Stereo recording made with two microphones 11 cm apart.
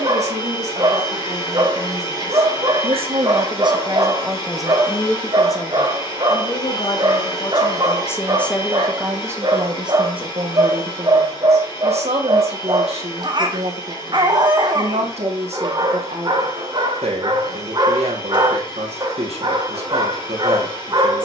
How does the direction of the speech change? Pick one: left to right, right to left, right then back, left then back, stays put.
left then back.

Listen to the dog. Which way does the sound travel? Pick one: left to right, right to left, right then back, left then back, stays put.
stays put.